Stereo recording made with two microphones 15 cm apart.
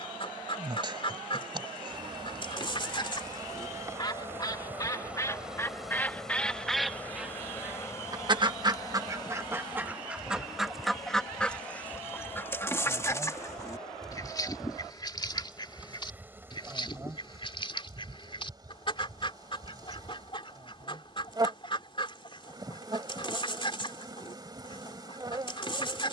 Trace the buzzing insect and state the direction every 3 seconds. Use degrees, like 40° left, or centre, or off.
30° right, 20° right, 20° left, 30° left, 10° left, 20° right, 30° right, 30° right, 30° right.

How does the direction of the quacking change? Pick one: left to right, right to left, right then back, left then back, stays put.
right then back.